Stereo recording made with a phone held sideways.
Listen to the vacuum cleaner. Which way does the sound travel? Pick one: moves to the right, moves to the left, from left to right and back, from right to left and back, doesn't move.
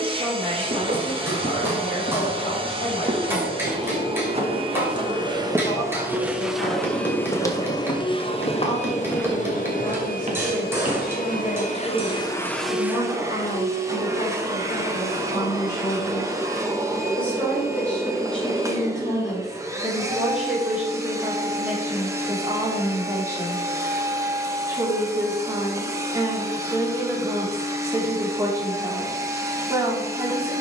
from right to left and back.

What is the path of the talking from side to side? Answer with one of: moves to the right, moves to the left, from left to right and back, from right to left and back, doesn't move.
moves to the right.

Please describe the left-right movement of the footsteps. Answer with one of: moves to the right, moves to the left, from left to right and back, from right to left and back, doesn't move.
from right to left and back.